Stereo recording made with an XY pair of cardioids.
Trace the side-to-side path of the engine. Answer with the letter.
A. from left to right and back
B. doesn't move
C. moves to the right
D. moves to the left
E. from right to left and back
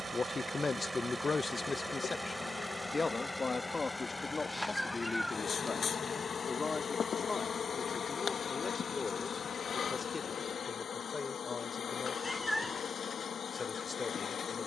D.